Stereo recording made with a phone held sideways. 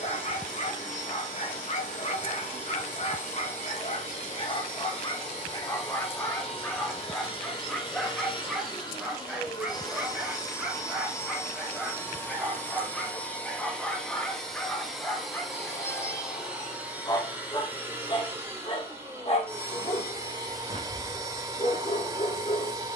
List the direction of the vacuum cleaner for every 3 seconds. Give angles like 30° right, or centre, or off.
50° left, 50° left, 40° left, 20° left, 10° left, 10° right, 20° right, 20° right.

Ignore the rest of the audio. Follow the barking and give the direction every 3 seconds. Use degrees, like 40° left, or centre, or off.
50° left, 40° left, 10° left, 10° right, centre, 20° left, 40° left, 40° left.